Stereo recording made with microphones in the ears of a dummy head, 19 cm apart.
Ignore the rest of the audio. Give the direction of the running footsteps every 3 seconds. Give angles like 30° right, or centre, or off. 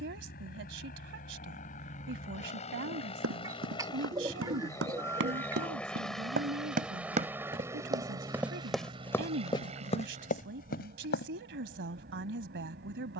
off, 60° right, 20° right, 30° left, off.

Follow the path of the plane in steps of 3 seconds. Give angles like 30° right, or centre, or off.
40° left, 20° left, 10° right, 30° right, 40° right.